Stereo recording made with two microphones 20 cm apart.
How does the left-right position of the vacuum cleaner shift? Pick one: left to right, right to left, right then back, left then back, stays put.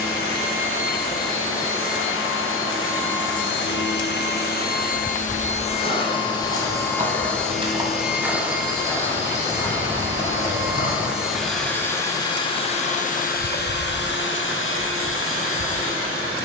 right then back.